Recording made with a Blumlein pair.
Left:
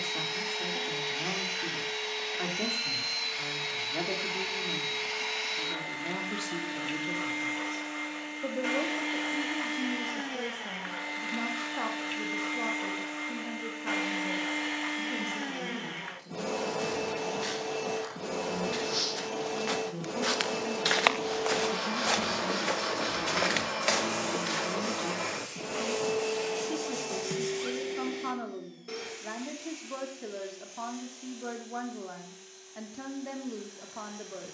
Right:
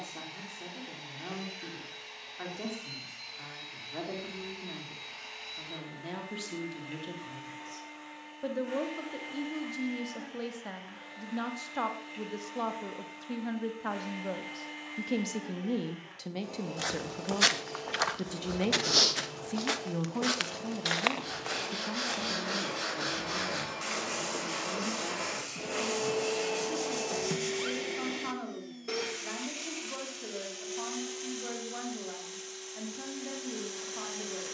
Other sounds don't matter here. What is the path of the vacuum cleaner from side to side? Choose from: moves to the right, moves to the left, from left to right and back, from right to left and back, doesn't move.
moves to the right.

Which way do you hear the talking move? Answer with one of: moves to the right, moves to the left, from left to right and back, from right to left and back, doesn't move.
from left to right and back.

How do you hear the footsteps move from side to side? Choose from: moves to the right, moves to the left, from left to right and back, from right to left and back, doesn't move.
moves to the left.